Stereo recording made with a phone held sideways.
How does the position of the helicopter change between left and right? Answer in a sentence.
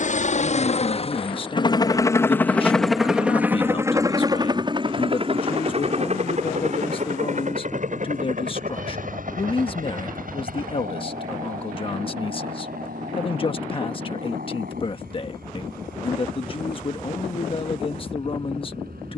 In this clip you hear the helicopter move from left to right.